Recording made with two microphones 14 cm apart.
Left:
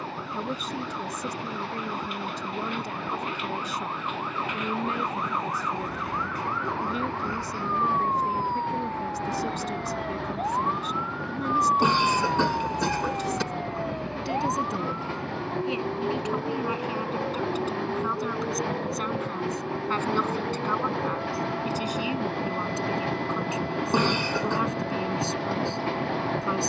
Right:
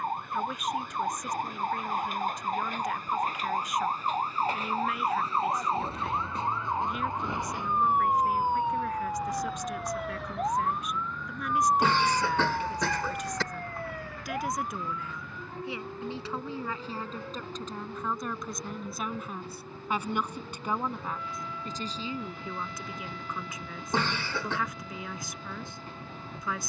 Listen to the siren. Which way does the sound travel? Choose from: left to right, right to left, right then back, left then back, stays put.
right to left.